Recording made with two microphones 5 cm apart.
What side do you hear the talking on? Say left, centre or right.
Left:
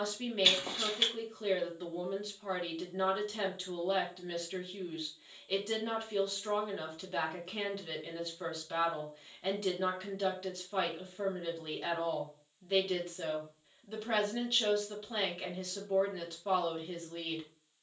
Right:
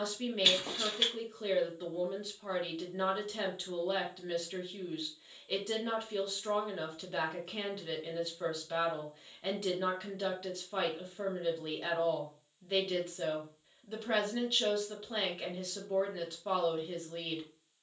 centre.